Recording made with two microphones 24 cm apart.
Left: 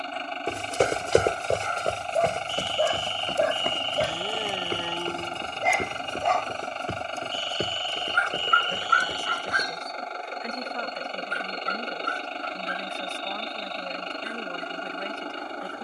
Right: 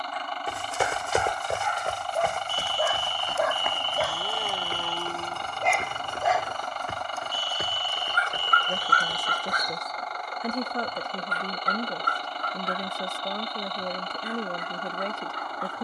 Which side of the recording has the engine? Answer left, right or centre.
left.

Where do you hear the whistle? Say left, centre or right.
left.